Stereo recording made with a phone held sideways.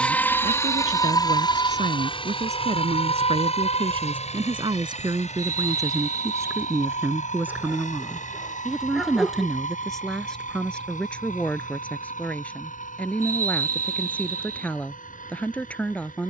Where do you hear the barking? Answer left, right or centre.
centre.